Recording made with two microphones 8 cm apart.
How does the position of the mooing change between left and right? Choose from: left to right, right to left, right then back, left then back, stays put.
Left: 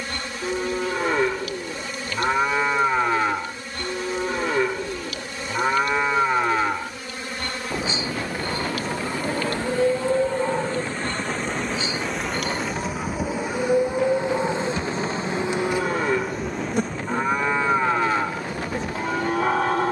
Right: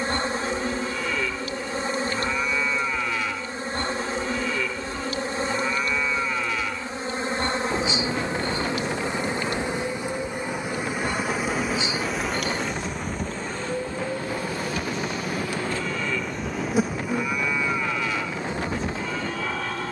stays put.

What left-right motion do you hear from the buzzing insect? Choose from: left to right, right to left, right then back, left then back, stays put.
left then back.